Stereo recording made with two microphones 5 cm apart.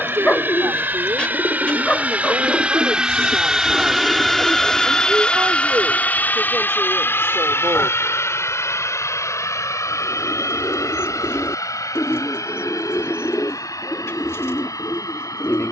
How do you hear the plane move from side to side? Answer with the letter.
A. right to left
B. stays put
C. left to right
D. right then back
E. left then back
A.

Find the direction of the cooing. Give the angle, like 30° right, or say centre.
60° left.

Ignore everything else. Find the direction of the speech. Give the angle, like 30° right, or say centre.
60° right.